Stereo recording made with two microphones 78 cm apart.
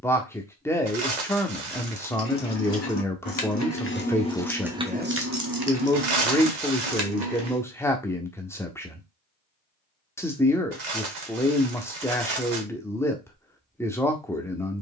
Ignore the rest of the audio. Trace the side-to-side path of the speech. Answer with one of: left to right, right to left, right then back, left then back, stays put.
stays put.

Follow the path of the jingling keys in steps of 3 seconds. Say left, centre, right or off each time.
left, centre, right, off, off.